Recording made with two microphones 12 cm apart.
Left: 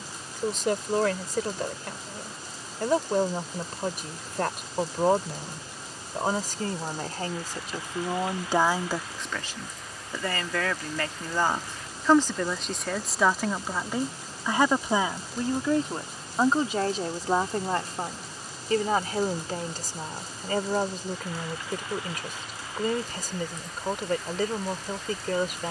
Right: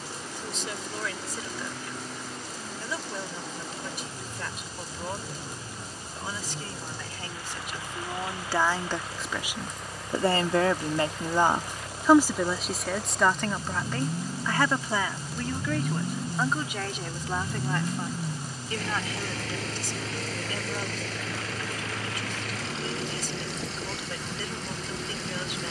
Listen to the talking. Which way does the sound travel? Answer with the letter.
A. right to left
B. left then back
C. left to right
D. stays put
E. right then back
E.